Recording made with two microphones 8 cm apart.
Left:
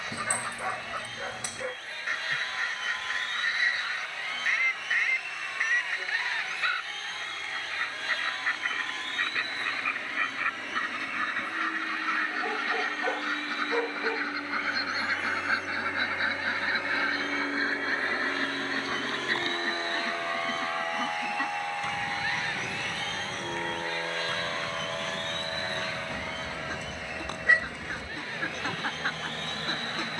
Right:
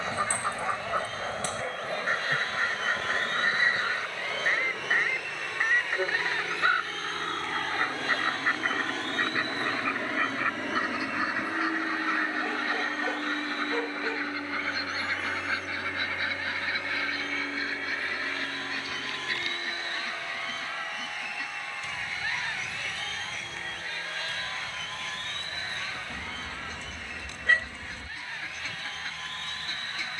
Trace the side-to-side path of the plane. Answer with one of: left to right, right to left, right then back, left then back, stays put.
right to left.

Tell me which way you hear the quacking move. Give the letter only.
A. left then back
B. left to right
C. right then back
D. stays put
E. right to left
E.